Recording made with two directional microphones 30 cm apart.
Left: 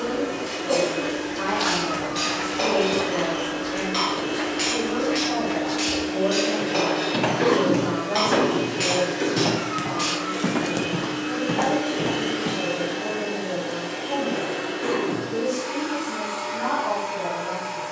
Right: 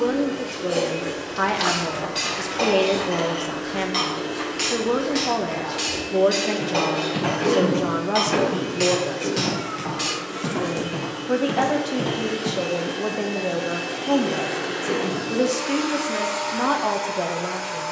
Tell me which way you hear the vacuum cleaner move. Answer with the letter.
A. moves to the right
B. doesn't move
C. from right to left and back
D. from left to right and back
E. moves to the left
A.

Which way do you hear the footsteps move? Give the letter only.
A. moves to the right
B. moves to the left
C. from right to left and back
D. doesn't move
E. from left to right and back
C.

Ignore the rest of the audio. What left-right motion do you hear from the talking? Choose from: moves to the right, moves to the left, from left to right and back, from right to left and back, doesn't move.
doesn't move.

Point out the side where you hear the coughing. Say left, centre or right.
left.